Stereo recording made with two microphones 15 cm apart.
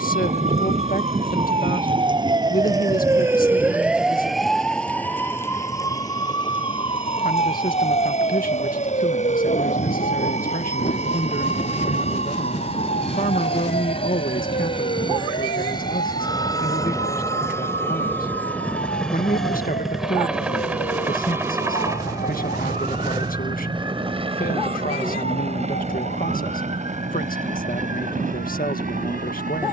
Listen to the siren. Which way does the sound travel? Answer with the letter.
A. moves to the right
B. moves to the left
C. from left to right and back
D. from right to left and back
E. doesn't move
B.